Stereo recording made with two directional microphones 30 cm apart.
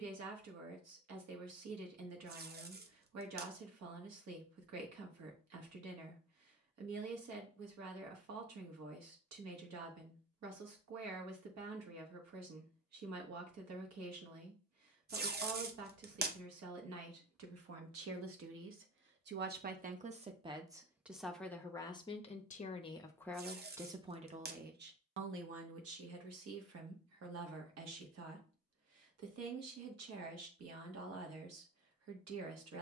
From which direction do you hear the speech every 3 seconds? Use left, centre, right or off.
right, right, right, right, right, right, right, centre, right, right, right.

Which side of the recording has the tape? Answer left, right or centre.
right.